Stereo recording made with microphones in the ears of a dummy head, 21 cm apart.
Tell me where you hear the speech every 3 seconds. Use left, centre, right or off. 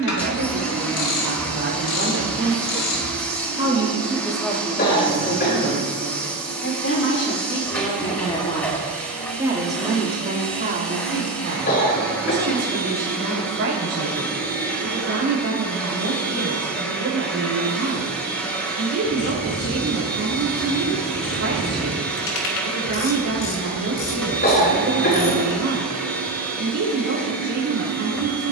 right, centre, left, right, right, right, right, right, right, right.